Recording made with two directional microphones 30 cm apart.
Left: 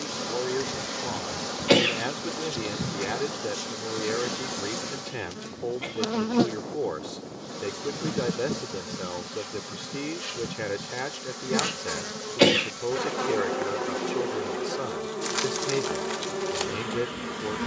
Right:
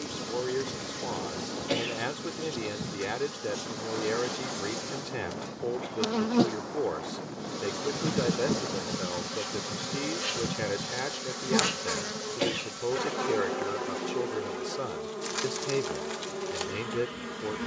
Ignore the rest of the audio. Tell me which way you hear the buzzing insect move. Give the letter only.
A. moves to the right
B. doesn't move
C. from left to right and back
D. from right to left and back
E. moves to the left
C.